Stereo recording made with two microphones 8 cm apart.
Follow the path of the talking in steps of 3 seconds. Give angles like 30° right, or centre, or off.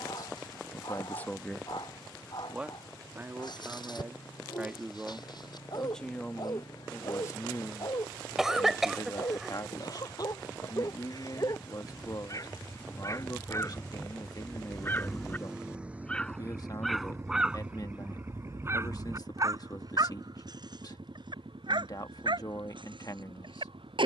20° left, 20° right, 30° left, 50° left, 50° left, 50° left, 50° left, 50° left.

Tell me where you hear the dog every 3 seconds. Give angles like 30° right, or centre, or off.
60° left, 60° left, 60° left, 50° left, 40° left, centre, 40° right, 70° right.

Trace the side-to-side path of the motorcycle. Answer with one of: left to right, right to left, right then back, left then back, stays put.
left to right.